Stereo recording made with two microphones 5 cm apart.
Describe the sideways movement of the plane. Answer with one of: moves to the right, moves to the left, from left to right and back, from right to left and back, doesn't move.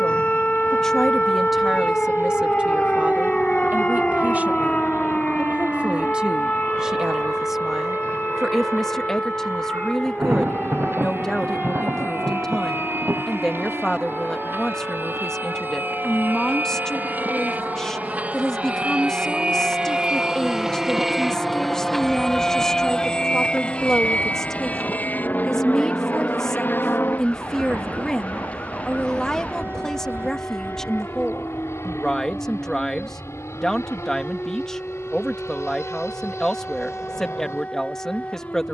moves to the left.